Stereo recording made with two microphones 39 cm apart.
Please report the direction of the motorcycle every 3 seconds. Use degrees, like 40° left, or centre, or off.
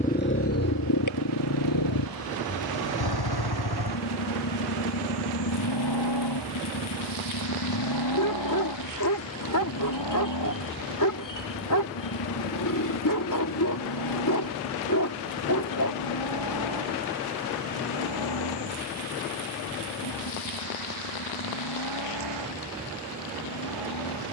50° left, 70° left, 70° left, 70° left, 80° left, 80° left, 80° left, 80° left.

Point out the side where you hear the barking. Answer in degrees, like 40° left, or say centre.
50° left.